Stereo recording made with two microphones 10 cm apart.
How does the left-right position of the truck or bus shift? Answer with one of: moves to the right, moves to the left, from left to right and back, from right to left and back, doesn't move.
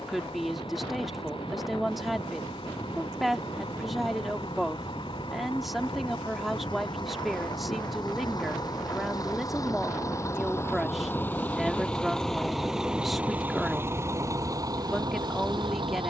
moves to the right.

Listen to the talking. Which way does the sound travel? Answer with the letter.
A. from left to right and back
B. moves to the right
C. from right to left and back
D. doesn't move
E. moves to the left
D.